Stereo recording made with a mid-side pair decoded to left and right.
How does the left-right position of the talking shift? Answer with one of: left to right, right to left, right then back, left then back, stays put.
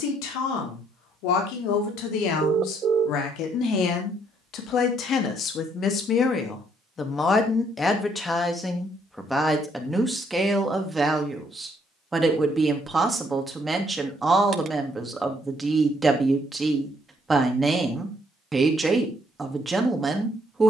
left to right.